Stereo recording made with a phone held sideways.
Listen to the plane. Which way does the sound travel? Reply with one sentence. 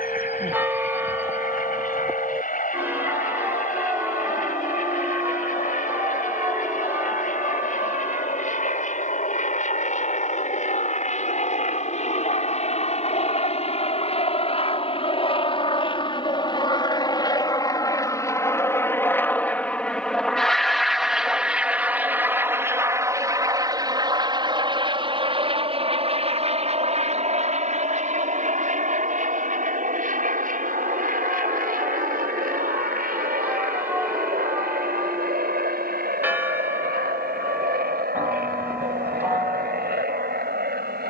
In this clip you hear the plane move to the right.